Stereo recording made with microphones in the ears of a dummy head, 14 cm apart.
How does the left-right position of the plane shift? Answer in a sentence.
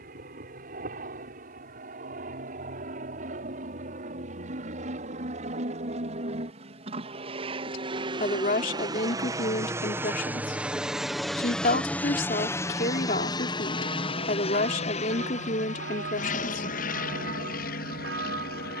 You can hear the plane travel towards the left.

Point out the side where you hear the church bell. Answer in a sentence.
In this clip you hear the church bell on the right.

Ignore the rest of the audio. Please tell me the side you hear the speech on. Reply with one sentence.
You can hear the speech on the left.